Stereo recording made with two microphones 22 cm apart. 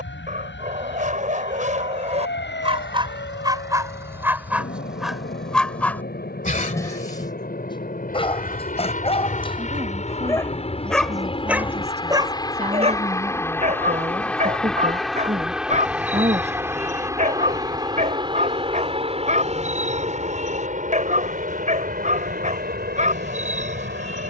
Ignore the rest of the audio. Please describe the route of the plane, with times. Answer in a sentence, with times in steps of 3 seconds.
In this clip you hear the plane on the left from 0 s, in the centre from 12 s and on the right from 18 s.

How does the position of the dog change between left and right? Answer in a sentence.
In this clip you hear the dog move from right to left and back again.